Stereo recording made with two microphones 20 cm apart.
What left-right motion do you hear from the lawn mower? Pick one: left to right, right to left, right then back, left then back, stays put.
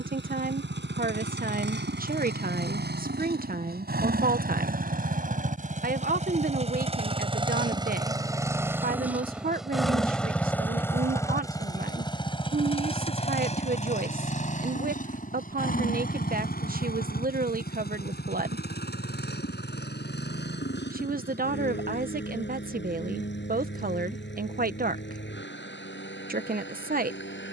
right to left.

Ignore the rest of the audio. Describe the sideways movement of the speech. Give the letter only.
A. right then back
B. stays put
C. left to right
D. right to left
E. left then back
B.